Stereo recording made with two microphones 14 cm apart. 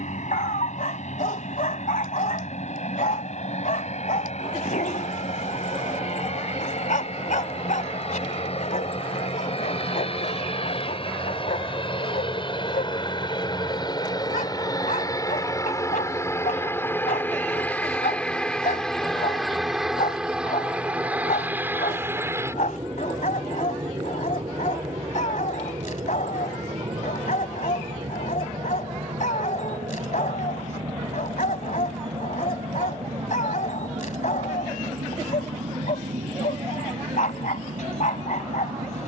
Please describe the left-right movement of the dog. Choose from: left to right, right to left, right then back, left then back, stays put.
stays put.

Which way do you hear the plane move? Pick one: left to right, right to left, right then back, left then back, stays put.
left to right.